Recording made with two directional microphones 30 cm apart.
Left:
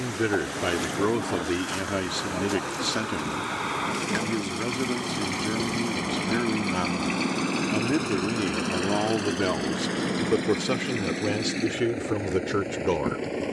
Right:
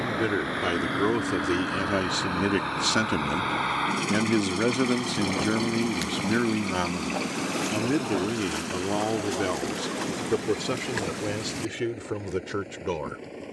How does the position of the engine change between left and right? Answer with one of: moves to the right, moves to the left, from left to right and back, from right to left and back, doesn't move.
moves to the left.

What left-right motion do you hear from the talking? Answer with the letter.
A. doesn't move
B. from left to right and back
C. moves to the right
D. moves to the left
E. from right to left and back
B.